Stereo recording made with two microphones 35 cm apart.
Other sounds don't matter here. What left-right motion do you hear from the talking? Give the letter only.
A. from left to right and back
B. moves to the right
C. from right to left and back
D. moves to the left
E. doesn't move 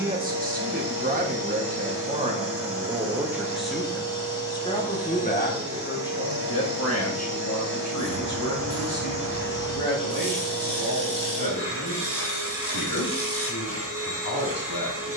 D.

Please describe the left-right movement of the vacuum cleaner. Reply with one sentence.
You can hear the vacuum cleaner stay in one place.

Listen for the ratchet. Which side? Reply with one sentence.
You can hear the ratchet on the left.